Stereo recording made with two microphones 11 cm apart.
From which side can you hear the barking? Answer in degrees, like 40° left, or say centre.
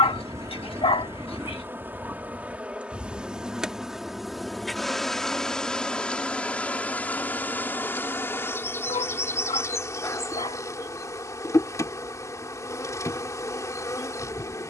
60° left.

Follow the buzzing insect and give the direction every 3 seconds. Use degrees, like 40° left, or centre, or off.
20° right, centre, 20° left, 30° left, 30° left.